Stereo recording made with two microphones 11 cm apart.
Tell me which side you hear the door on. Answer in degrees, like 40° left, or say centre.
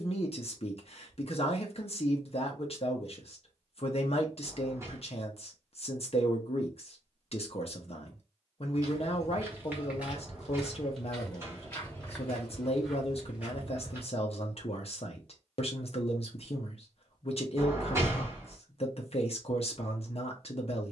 20° right.